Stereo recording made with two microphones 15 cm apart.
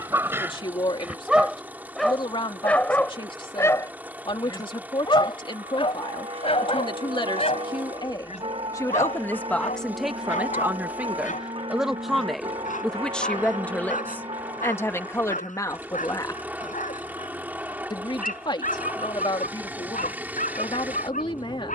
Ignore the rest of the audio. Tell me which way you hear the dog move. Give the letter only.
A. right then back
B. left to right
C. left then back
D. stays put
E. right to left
E.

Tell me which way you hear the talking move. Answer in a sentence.
In this clip you hear the talking move from left to right and back again.